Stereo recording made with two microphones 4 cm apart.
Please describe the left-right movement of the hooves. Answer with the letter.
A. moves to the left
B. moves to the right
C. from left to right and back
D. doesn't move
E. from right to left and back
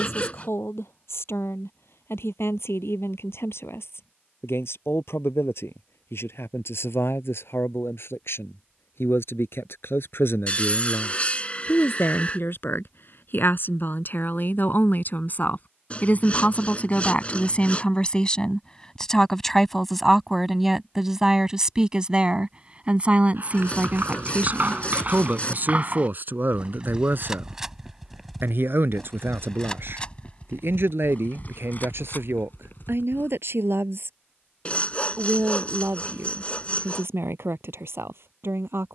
A.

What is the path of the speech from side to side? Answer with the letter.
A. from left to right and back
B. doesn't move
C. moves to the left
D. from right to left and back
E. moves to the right
E.